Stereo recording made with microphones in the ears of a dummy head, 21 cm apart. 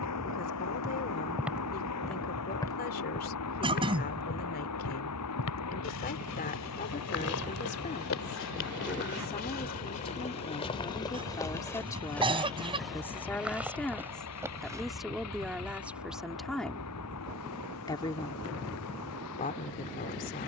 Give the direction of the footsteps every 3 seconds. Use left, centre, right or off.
centre, left, left, left, centre, off, off.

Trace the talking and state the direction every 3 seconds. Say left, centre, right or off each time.
left, left, left, left, centre, centre, left.